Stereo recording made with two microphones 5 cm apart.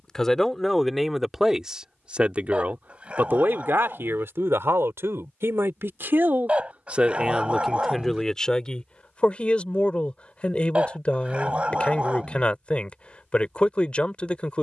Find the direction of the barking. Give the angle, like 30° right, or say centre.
30° right.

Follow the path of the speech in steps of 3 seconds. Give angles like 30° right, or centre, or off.
10° right, 60° right, 10° right, 30° left, 30° left.